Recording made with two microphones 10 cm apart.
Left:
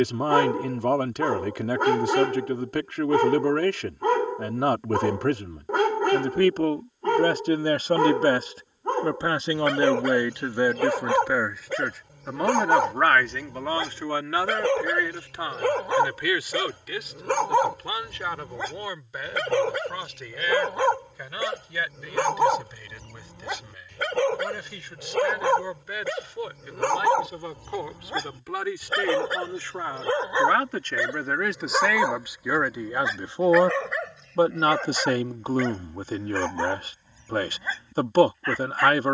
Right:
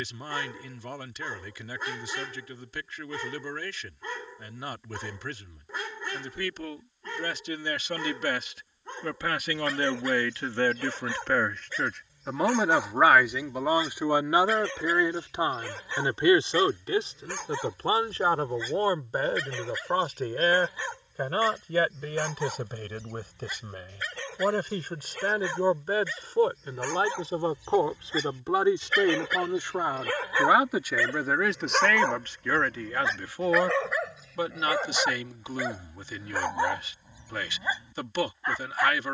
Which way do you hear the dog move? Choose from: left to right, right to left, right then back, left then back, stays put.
left to right.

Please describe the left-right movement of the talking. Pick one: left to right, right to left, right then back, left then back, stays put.
right then back.